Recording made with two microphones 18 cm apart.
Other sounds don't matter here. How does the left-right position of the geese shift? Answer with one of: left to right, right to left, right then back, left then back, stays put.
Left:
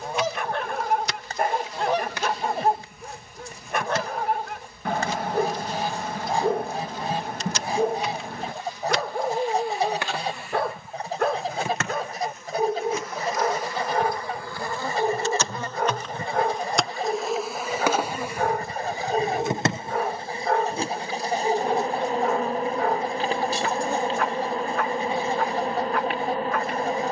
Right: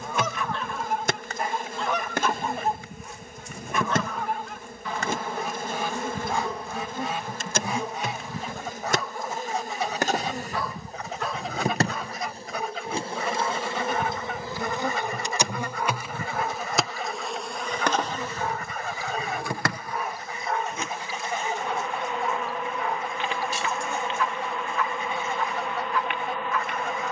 stays put.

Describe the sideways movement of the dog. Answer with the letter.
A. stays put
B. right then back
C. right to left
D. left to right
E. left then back
A.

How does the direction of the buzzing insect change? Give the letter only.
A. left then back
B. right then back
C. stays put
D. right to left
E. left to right
D.